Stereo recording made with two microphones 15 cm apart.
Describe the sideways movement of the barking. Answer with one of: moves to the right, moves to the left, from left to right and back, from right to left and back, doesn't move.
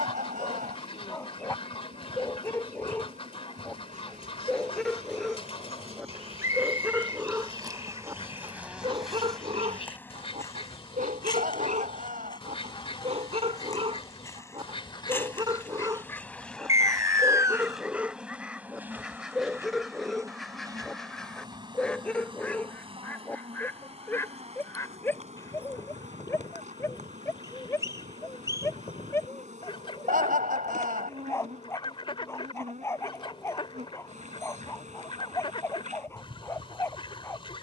from left to right and back.